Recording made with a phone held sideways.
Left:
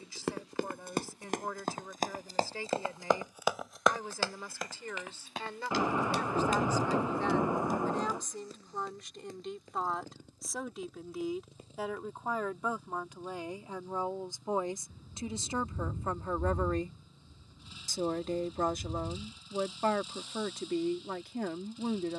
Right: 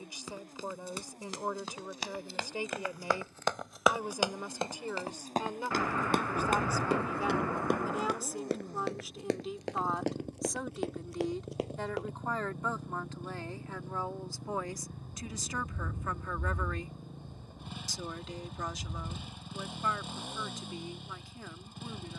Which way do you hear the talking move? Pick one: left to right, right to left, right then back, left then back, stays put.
right to left.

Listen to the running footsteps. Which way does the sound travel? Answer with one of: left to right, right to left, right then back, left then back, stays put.
left to right.